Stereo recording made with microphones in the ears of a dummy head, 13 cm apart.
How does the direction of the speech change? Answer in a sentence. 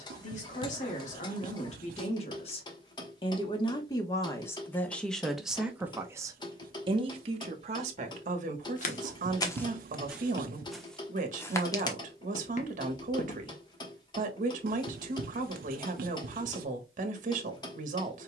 In this clip you hear the speech travel towards the right.